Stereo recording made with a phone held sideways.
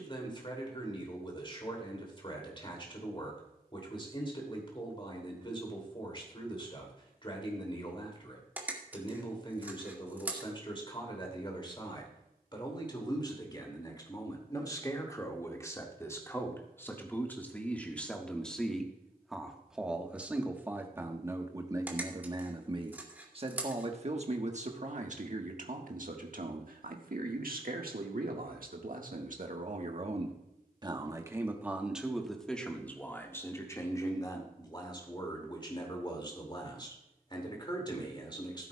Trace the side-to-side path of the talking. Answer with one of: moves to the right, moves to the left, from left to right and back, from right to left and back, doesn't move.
from left to right and back.